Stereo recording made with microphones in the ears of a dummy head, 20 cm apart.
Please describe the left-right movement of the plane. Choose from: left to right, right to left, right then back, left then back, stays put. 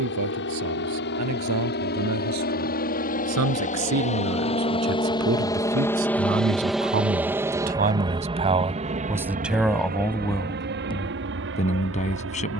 left to right.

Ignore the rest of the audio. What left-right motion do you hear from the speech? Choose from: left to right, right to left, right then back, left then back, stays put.
right to left.